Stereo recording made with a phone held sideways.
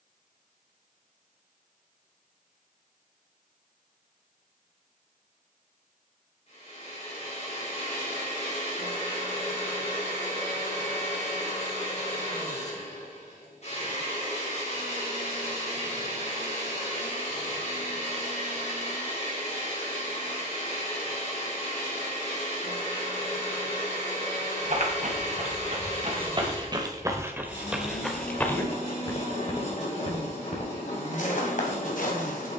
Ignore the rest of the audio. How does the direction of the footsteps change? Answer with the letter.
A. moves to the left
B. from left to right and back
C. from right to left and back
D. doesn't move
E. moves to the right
A.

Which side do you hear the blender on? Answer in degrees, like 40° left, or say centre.
50° left.